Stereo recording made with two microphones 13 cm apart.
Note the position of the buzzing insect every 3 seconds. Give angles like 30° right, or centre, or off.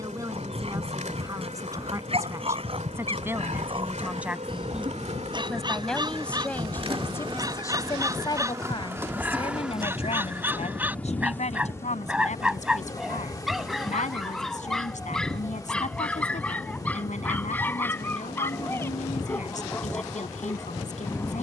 70° right, 60° right, 40° right, 10° left, 30° left, 30° left, 30° left.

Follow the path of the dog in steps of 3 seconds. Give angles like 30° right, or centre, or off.
50° right, 40° right, 30° right, 20° right, centre, 10° left, 20° left.